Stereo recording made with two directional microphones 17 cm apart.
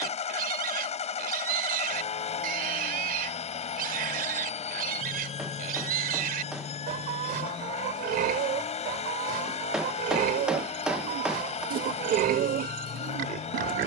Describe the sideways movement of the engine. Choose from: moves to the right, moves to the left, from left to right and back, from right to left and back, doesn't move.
doesn't move.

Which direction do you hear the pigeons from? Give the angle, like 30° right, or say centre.
60° right.